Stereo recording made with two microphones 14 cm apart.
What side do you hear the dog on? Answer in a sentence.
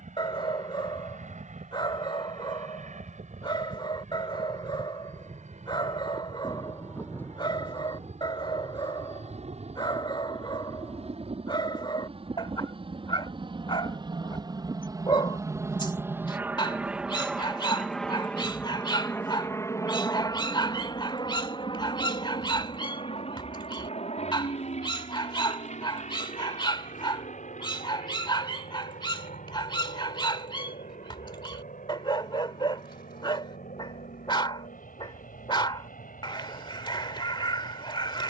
You can hear the dog on the left.